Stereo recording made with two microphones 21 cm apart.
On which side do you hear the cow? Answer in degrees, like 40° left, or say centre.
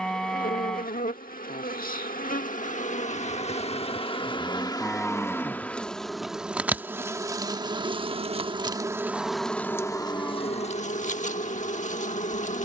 centre.